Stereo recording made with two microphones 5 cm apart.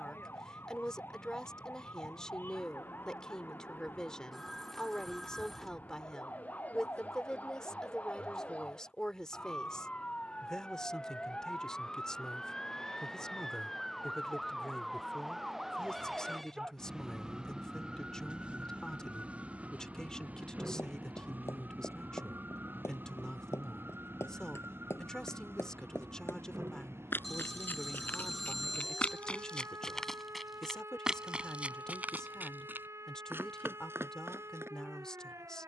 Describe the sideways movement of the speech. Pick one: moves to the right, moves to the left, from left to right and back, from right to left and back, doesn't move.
doesn't move.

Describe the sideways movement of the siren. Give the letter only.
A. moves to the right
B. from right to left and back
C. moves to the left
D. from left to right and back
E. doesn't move
A.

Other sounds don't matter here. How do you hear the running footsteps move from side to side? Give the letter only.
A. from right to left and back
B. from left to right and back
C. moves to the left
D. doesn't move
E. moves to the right
E.